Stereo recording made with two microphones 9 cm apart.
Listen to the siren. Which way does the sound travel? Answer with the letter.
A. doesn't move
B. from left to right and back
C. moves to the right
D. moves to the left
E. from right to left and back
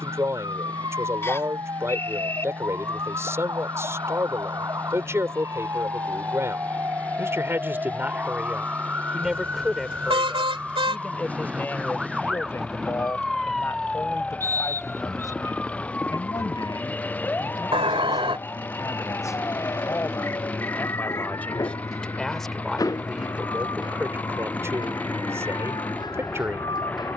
D.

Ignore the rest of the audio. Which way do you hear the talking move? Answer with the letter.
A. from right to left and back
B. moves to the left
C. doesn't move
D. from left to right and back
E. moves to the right
A.